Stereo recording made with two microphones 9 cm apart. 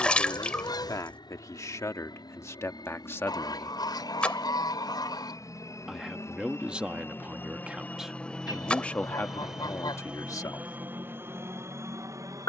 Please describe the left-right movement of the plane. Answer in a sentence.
In this clip you hear the plane go from the left side to the right.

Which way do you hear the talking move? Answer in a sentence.
In this clip you hear the talking move from left to right and back again.